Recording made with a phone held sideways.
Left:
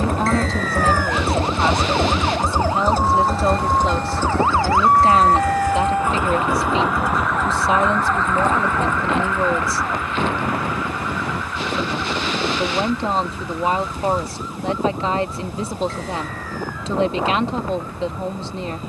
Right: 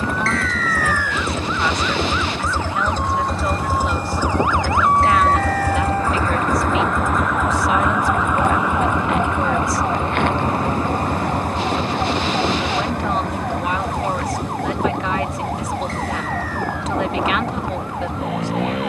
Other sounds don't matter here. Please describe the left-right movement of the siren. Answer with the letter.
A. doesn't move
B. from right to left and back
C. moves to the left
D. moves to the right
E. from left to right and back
D.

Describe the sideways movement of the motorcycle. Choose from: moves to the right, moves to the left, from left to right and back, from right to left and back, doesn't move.
moves to the right.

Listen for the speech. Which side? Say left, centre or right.
left.